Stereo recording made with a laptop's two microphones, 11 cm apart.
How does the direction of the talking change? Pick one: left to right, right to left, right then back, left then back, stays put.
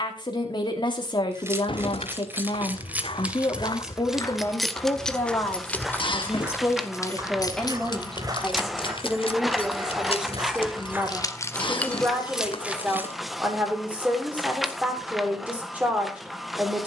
left to right.